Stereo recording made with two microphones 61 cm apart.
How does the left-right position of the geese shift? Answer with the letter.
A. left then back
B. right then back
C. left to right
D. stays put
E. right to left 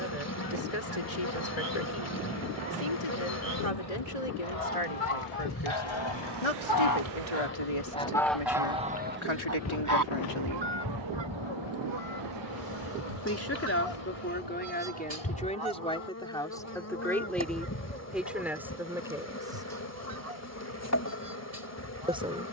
C.